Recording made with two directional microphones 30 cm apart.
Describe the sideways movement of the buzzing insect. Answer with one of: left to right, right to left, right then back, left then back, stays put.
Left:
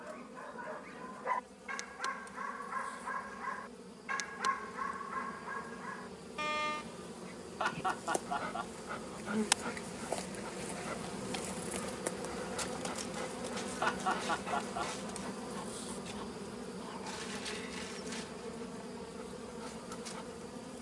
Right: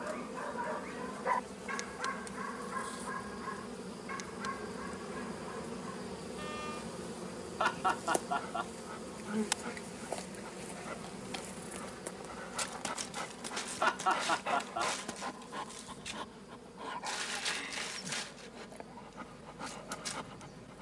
right to left.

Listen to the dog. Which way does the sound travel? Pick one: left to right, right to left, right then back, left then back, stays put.
left then back.